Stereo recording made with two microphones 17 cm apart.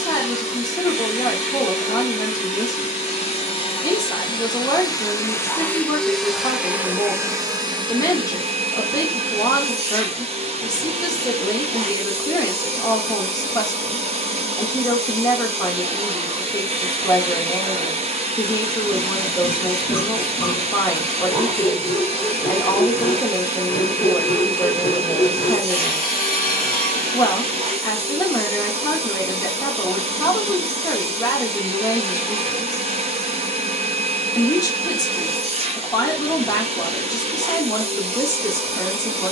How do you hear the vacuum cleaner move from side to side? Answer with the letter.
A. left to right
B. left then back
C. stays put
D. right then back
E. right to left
A.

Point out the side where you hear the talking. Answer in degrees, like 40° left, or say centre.
20° left.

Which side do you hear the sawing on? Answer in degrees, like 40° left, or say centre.
60° left.